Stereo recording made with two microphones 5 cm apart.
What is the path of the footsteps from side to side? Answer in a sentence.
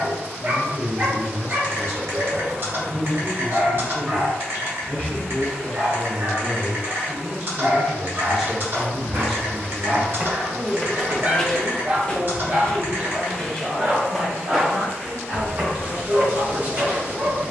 In this clip you hear the footsteps move from right to left and back again.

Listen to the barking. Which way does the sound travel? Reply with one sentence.
In this clip you hear the barking stay put.